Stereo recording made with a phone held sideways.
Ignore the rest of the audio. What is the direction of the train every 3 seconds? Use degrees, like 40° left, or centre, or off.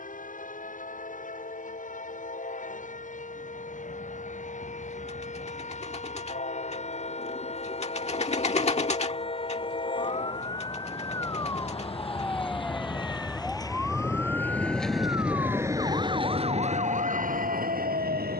60° left, 60° left, 50° left, 50° left, 20° left, 40° right.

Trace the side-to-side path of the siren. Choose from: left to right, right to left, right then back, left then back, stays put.
left to right.